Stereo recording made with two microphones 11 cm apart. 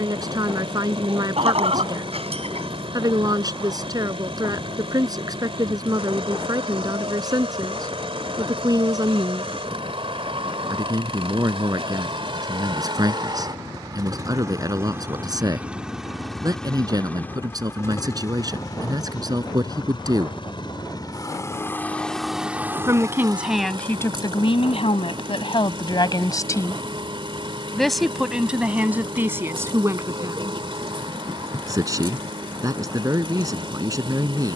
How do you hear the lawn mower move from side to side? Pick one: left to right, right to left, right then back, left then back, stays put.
left then back.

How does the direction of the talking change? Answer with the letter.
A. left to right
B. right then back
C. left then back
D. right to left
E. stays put
C.